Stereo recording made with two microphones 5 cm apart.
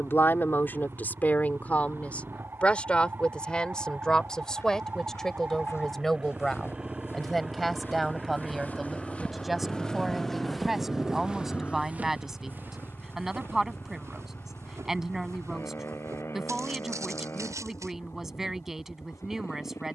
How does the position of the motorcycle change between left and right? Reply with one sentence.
In this clip you hear the motorcycle travel towards the left.